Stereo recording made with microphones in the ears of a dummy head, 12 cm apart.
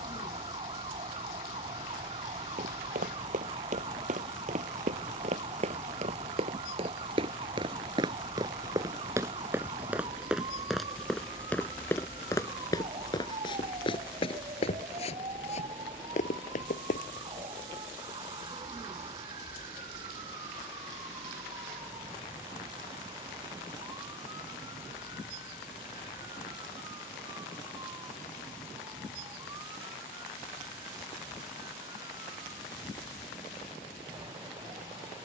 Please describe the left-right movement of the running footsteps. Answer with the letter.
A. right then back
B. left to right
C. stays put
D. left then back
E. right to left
E.